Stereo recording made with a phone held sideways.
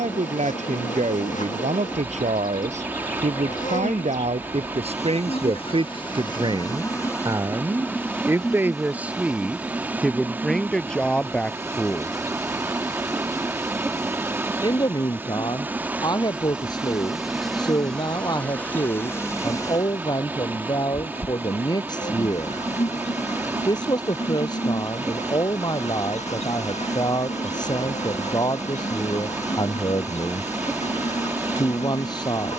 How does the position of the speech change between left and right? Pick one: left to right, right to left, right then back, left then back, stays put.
right to left.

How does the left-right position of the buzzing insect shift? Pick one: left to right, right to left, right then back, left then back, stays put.
right then back.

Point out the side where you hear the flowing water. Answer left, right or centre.
centre.